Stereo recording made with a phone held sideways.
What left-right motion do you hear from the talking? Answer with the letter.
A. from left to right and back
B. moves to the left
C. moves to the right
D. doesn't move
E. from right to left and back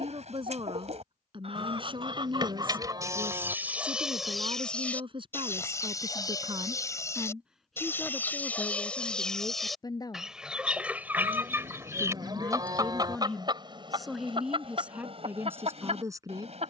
E.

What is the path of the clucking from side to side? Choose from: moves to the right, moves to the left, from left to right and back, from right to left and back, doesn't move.
from right to left and back.